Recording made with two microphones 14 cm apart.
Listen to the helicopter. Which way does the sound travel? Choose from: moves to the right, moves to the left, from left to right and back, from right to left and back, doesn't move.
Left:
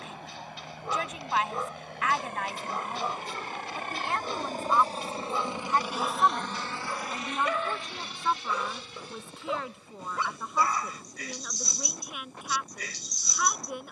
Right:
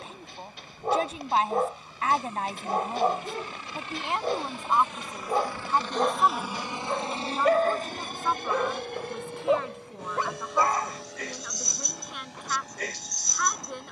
moves to the right.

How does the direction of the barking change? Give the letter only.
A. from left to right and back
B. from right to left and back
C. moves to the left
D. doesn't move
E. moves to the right
D.